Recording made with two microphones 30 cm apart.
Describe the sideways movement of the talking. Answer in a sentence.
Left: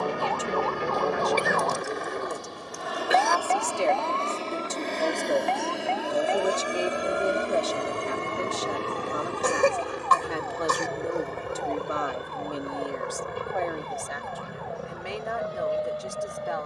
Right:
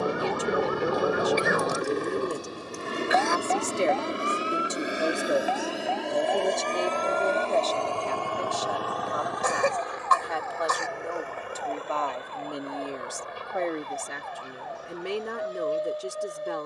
You can hear the talking move from right to left and back again.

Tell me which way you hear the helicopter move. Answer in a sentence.
In this clip you hear the helicopter go from the right side to the left.